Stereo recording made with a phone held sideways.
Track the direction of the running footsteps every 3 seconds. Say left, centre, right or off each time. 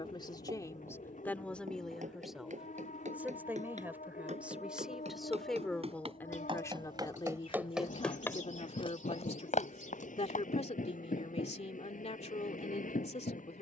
right, right, centre, left, off.